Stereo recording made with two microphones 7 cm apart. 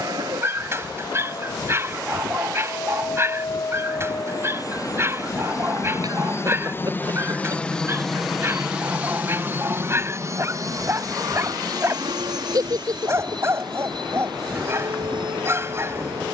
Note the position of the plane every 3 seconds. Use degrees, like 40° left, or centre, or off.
70° left, 60° left, 20° left, 40° right, 60° right, 70° right.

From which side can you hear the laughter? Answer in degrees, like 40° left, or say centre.
50° right.